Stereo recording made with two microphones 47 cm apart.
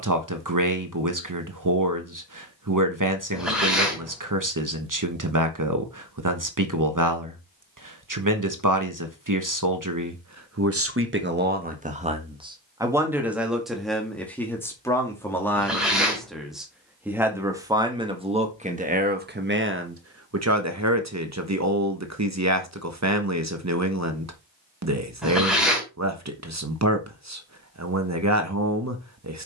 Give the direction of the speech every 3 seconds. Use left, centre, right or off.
right, right, right, right, centre, centre, right, right, right, right.